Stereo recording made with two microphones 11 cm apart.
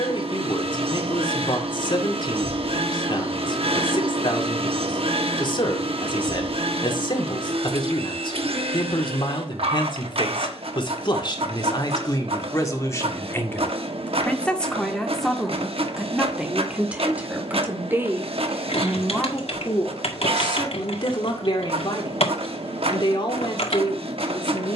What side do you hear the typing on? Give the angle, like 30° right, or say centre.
70° left.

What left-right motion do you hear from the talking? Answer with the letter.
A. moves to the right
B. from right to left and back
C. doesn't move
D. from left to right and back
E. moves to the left
D.